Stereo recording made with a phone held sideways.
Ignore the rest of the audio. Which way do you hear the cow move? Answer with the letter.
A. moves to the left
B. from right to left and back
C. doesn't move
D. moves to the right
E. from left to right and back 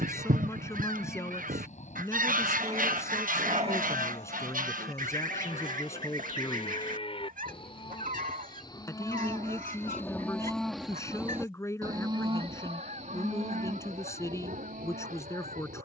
D.